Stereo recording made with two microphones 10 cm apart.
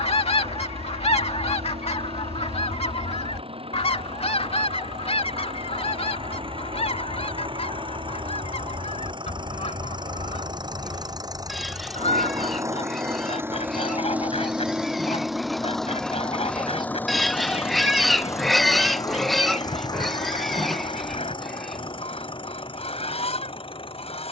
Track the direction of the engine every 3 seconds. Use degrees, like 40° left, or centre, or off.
70° right, 60° right, 60° right, 40° right, 20° right, 10° left, 40° left, 50° left.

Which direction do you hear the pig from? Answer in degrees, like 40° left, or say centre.
centre.